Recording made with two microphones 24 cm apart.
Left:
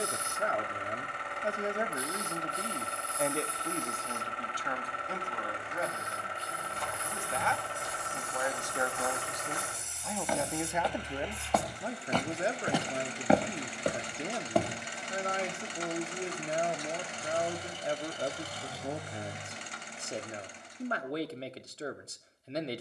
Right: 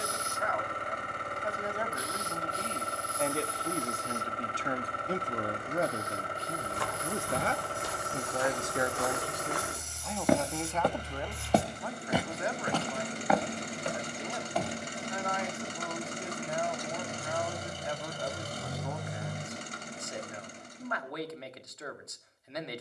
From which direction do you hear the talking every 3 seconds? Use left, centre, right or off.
left, right, right, centre, left, left, left, left.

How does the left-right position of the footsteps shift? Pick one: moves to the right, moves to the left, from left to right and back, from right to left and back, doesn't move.
moves to the left.